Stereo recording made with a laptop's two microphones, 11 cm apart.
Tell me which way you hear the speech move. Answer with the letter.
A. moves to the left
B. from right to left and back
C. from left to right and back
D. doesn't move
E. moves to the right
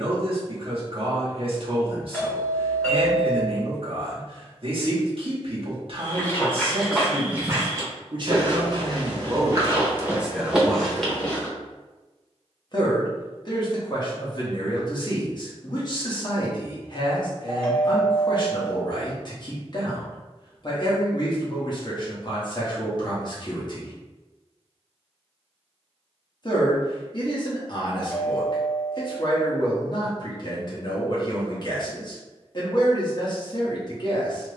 A.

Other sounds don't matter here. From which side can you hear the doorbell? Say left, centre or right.
centre.